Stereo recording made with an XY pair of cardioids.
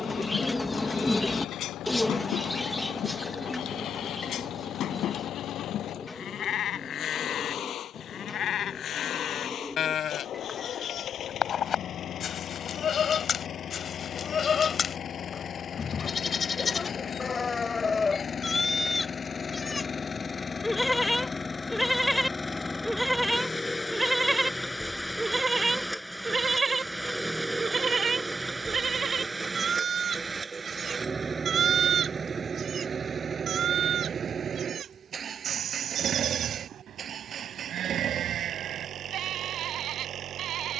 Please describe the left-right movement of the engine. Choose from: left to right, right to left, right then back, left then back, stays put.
left to right.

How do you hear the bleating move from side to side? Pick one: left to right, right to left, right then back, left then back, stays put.
left to right.